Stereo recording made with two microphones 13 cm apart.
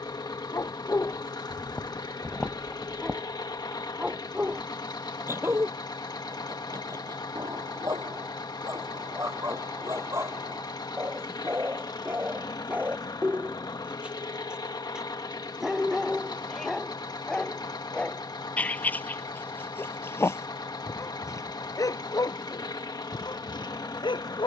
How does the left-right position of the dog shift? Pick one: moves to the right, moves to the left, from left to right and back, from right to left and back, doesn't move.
from left to right and back.